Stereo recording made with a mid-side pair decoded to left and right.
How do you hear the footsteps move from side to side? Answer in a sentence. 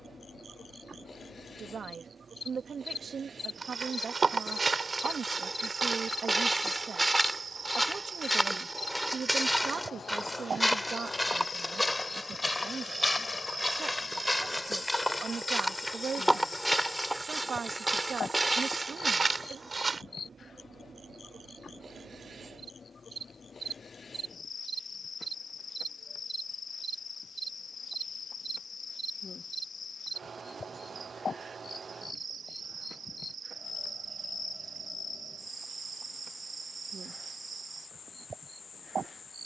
In this clip you hear the footsteps move from right to left and back again.